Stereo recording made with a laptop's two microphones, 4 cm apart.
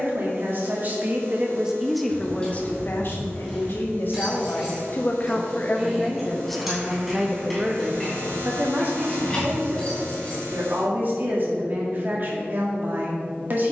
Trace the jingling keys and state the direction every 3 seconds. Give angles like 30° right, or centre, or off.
20° left, 10° right, centre, 20° left, off.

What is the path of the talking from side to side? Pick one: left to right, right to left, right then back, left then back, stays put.
left then back.